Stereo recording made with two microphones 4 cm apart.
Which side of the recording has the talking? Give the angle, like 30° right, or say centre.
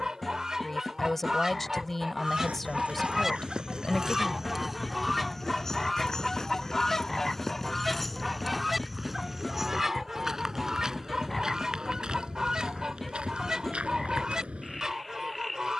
10° left.